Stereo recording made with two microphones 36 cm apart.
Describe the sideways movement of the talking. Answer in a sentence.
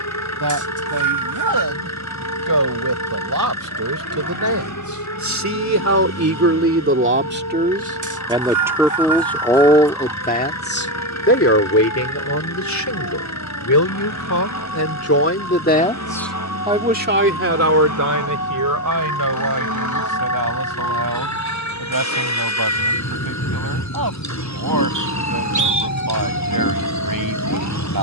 You can hear the talking move from right to left and back again.